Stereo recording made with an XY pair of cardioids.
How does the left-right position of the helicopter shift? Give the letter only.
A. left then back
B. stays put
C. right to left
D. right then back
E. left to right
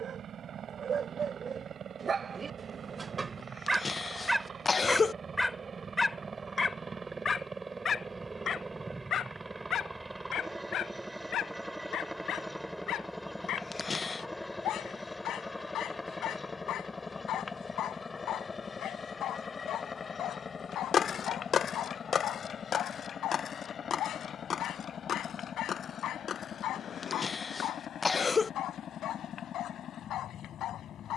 C.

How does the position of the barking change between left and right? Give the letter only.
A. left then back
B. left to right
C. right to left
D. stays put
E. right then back
C.